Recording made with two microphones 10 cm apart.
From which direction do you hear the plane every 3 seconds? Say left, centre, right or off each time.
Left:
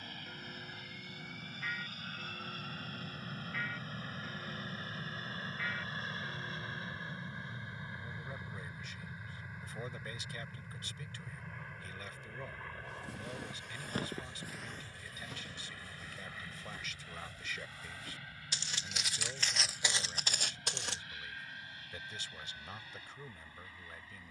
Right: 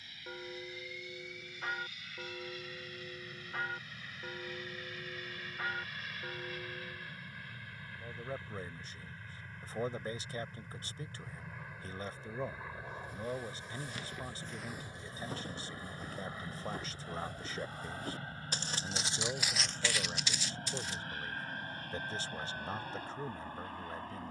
left, left, left, centre, centre, right, right, right.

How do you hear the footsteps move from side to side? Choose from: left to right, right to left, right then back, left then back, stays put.
right then back.